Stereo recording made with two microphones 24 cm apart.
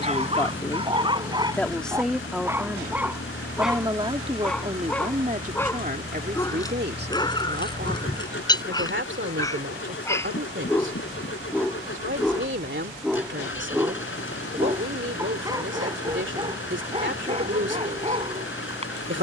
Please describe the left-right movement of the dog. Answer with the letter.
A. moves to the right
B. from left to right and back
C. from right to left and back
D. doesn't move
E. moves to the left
C.